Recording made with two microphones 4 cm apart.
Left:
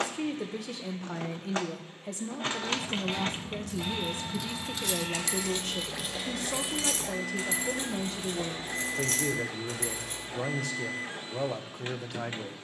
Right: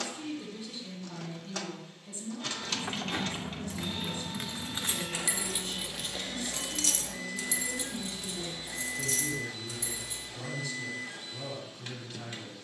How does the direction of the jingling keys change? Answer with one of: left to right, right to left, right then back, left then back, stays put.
right to left.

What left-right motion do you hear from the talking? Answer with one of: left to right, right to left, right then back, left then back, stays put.
stays put.